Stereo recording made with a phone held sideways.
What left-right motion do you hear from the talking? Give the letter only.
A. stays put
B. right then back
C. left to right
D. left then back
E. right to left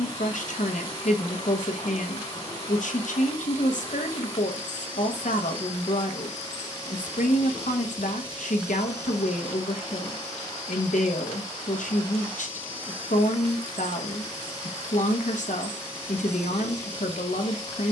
A.